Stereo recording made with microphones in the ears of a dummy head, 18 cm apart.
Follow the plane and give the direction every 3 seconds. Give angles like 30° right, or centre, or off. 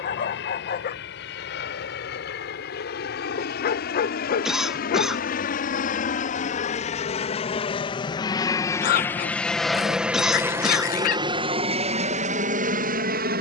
60° left, 50° left, 30° left, 10° right, 40° right.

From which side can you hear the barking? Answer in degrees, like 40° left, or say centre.
40° left.